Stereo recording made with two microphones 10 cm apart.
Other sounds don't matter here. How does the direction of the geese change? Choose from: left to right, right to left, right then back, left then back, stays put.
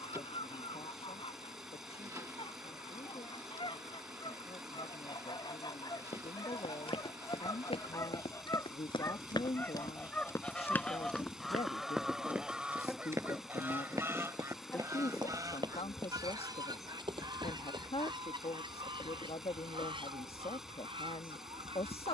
left to right.